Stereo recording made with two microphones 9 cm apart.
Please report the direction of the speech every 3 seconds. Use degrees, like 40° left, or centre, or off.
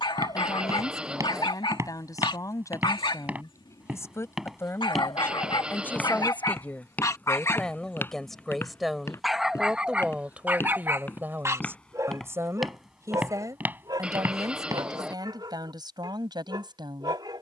40° left, 30° left, 10° left, 10° right, 40° right, 50° right.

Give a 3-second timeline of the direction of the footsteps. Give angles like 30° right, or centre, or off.
30° right, centre, 20° left, 20° left, 20° right, off.